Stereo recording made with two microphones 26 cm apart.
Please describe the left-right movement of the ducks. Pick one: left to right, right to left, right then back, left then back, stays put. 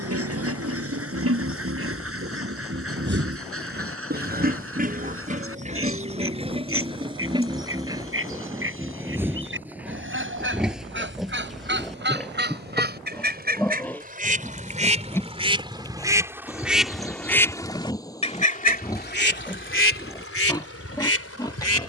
right to left.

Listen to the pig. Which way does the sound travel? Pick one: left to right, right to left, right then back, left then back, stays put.
right to left.